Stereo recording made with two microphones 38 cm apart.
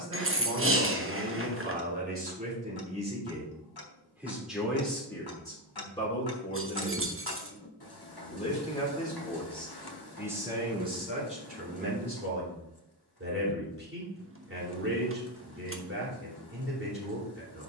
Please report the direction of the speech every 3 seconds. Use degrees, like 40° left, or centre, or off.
30° right, centre, 20° left, 10° right, 30° right, 30° right.